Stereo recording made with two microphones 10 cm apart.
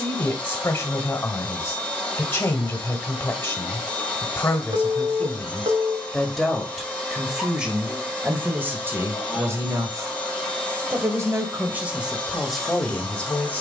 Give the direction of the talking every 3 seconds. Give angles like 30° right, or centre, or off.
20° left, 20° left, 10° right, 30° right, 10° left.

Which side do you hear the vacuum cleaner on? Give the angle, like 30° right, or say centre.
10° left.